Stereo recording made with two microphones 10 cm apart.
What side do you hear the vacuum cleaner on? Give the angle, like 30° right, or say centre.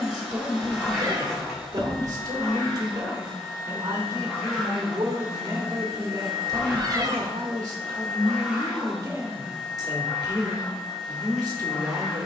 centre.